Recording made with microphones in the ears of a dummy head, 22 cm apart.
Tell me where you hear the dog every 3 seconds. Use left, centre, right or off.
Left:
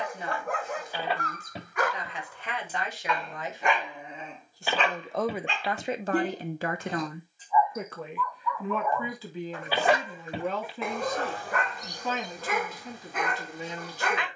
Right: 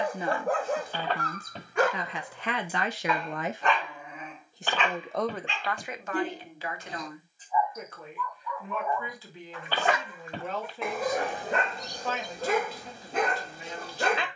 right, left, left, centre, right.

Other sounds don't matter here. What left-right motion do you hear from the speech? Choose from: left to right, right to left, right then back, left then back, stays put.
right to left.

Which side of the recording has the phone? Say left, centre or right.
centre.